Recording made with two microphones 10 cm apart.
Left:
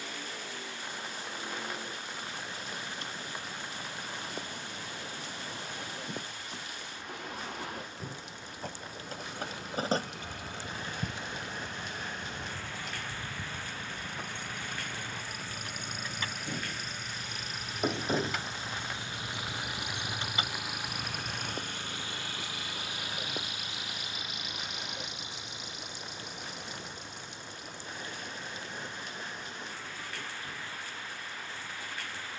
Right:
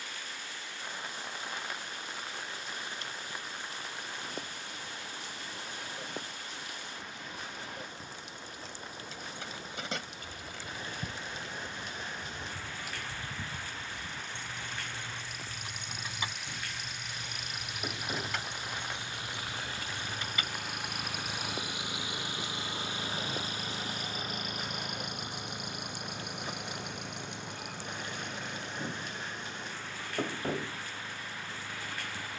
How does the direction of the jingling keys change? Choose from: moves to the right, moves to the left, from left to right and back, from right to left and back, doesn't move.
from left to right and back.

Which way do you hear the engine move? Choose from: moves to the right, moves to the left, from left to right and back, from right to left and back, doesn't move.
moves to the right.